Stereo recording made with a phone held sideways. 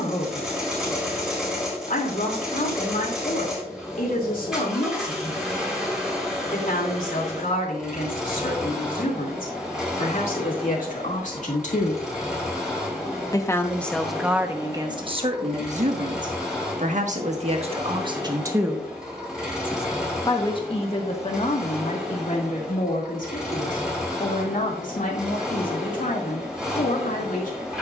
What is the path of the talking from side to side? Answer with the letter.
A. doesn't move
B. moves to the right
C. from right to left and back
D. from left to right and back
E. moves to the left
D.